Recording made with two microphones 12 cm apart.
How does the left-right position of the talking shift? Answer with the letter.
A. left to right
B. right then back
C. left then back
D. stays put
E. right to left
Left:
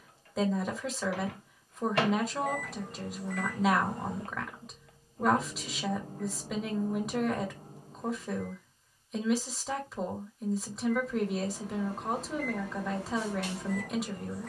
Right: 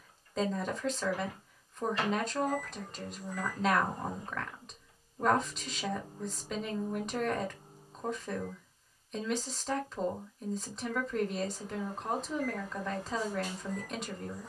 D.